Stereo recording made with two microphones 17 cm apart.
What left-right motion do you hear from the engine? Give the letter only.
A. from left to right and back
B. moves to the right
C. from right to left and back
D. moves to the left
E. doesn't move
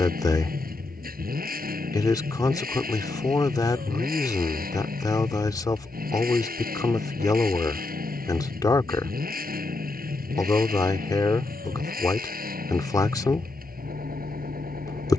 E.